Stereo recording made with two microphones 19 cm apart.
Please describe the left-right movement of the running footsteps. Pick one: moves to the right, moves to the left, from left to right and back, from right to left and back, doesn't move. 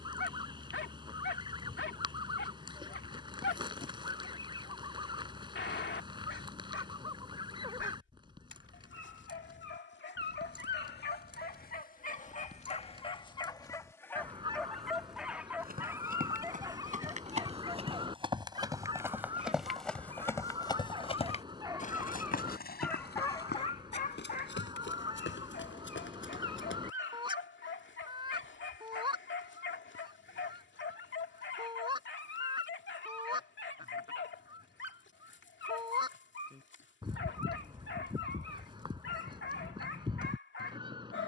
moves to the left.